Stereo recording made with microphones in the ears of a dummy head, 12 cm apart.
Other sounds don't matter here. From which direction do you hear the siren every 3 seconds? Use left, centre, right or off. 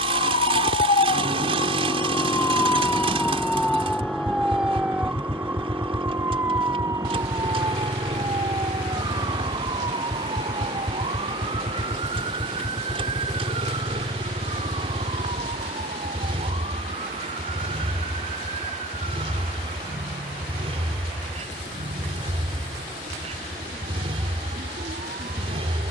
left, centre, right, right, right, right, right, right, right.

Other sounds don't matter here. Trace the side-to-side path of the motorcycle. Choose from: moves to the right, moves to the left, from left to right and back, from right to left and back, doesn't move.
doesn't move.